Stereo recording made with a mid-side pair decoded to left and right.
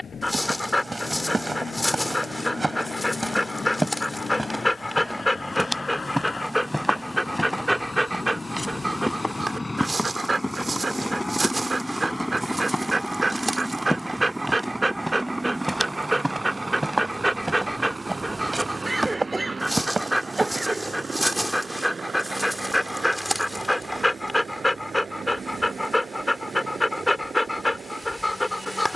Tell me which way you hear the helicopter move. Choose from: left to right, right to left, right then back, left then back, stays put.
left to right.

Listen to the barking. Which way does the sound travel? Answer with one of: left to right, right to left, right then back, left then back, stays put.
right then back.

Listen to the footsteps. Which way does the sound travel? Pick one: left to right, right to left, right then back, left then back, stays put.
left then back.